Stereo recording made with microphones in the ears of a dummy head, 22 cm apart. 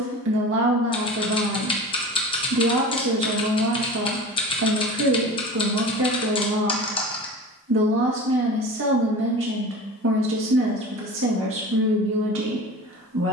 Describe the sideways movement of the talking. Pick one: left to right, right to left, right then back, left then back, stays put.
stays put.